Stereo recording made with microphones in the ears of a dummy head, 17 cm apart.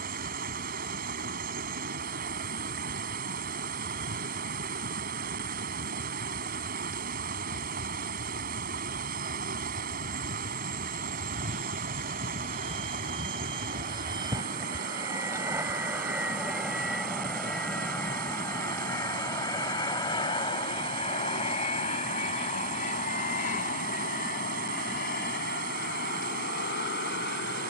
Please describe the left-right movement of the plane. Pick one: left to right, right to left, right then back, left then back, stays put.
right to left.